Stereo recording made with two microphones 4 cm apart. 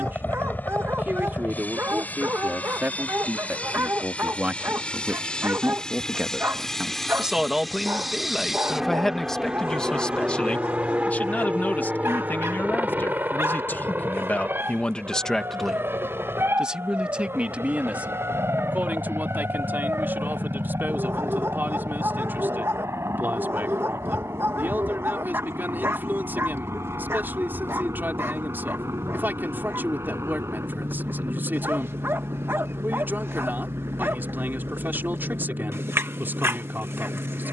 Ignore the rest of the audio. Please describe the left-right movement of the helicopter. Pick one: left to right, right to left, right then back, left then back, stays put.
left to right.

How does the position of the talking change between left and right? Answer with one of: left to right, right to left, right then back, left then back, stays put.
left then back.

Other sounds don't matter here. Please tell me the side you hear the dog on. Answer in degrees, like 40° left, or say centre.
70° right.